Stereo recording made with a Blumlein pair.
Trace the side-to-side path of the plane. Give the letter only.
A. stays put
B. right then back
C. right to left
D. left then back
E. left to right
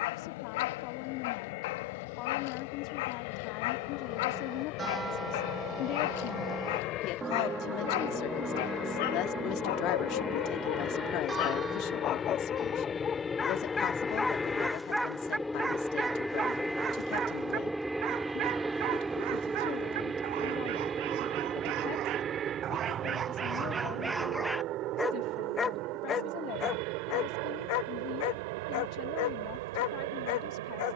E.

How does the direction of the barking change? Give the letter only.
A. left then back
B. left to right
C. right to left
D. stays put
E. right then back
E.